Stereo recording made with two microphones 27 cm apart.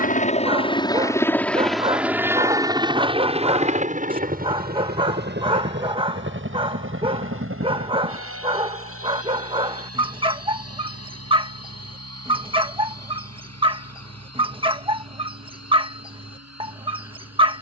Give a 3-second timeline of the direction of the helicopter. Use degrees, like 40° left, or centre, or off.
centre, 30° right, 40° right, 50° right, 50° right, 60° right.